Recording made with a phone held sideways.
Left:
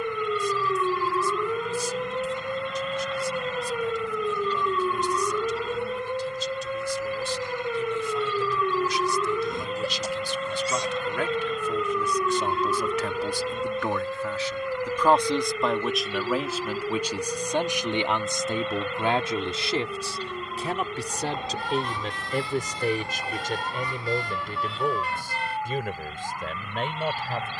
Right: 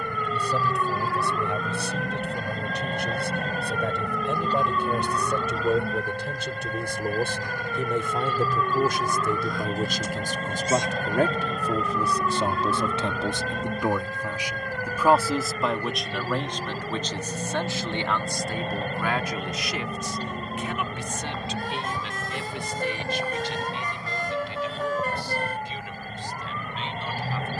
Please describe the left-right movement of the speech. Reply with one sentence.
In this clip you hear the speech go from the right side to the left.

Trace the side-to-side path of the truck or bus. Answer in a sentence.
You can hear the truck or bus stay in one place.